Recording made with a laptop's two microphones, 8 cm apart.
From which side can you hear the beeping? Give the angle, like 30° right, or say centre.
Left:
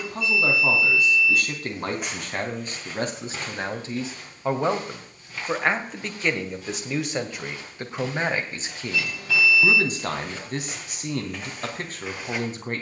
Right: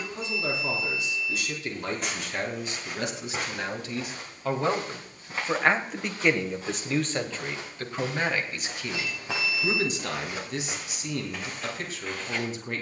80° left.